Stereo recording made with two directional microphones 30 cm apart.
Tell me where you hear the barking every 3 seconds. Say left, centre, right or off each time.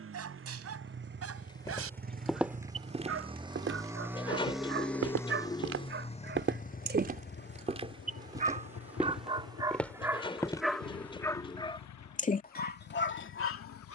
right, right, right, centre, left.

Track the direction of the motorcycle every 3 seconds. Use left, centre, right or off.
right, centre, left, left, left.